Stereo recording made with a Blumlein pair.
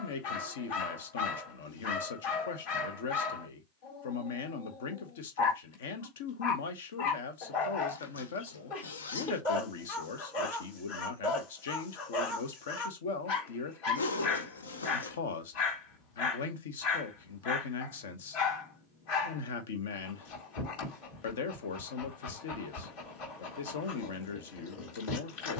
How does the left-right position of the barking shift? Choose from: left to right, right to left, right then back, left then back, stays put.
stays put.